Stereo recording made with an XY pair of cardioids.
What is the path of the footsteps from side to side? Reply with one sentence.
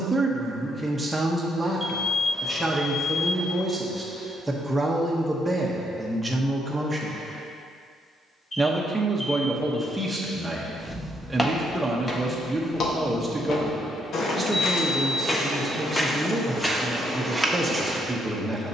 In this clip you hear the footsteps go left and come back.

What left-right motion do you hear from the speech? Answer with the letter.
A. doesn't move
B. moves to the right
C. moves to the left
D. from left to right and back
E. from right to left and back
A.